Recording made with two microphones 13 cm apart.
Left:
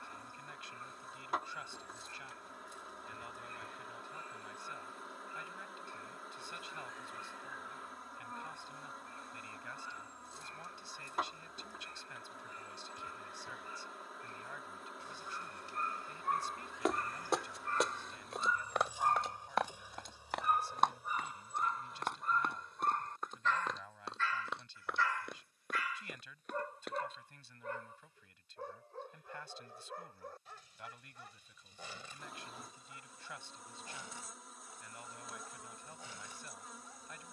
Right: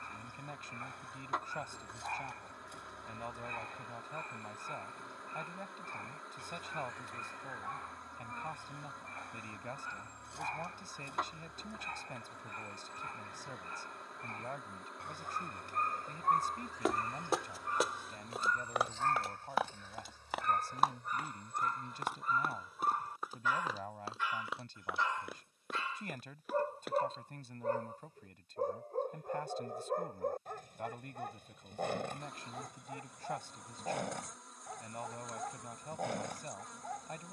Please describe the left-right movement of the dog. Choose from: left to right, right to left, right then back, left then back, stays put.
left then back.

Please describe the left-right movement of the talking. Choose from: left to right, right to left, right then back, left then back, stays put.
stays put.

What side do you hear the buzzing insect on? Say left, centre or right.
centre.